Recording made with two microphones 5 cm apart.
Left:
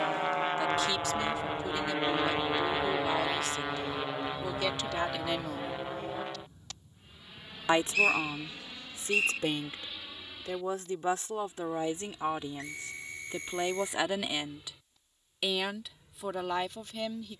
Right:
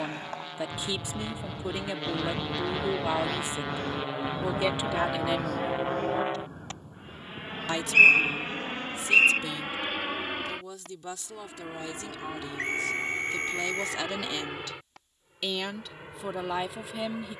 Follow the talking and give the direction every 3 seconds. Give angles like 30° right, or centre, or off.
20° right, 20° right, 30° left, 40° left, 20° left, centre.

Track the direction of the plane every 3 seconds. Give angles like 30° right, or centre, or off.
30° left, 10° right, 40° right, 50° right, 60° right, 60° right.